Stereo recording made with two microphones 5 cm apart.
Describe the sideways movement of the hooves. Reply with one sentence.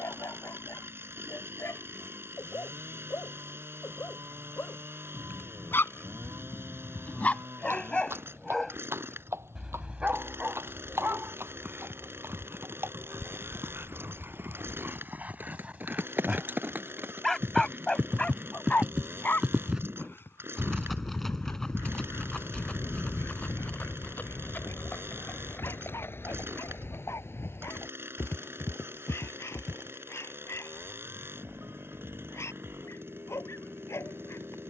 In this clip you hear the hooves go from the right side to the left.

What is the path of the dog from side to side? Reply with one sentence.
In this clip you hear the dog go right and come back.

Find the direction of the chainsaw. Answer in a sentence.
In this clip you hear the chainsaw on the right.